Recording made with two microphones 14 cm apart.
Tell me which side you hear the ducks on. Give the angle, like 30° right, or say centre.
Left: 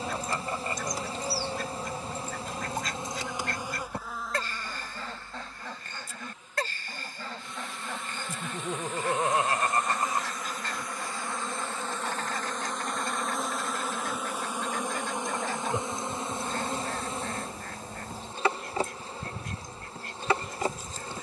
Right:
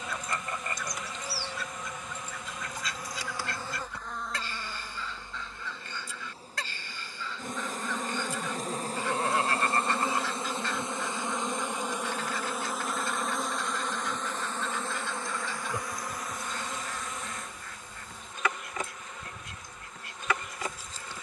60° left.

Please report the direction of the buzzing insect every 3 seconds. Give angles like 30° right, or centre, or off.
30° left, centre, 40° right, 30° right, centre, 30° left, 30° left.